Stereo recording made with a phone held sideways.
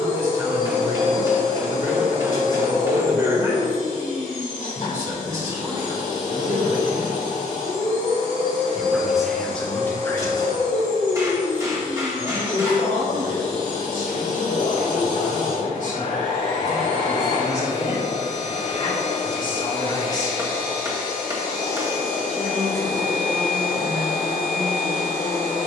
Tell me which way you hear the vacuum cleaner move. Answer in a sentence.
In this clip you hear the vacuum cleaner stay in one place.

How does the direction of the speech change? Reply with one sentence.
You can hear the speech move from right to left and back again.